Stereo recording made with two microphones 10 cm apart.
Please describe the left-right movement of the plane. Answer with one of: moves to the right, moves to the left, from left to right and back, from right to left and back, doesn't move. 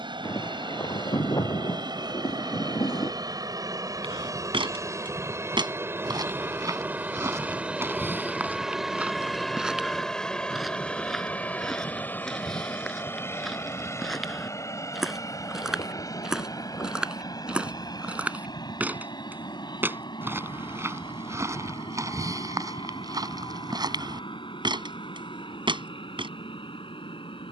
moves to the left.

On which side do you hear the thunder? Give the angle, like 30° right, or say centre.
40° left.